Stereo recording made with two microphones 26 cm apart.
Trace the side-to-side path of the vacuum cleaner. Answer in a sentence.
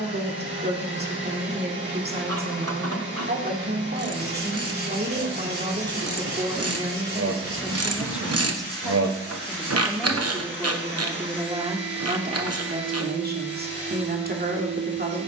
In this clip you hear the vacuum cleaner stay in one place.